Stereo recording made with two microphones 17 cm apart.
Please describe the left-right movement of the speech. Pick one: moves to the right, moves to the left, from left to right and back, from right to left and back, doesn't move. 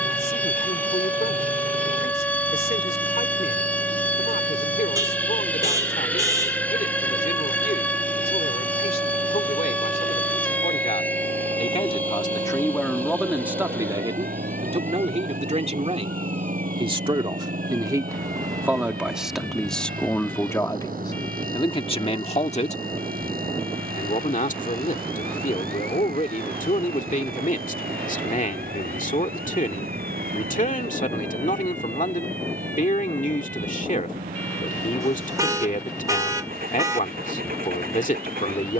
from left to right and back.